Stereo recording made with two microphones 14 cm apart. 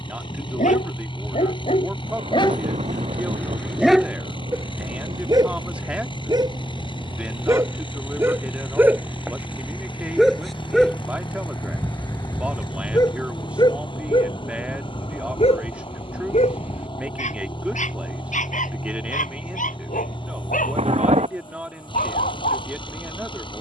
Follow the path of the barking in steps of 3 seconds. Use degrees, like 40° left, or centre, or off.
50° left, 20° right, 20° right, centre, 30° left, 50° left, 70° left, 80° left.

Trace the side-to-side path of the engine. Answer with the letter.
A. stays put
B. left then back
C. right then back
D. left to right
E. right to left
A.